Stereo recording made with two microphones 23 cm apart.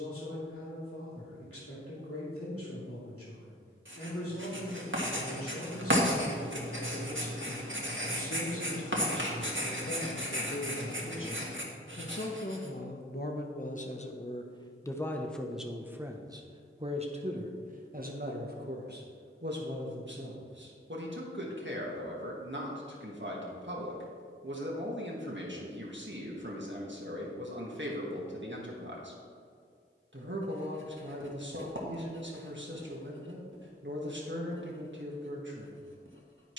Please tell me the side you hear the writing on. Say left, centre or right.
right.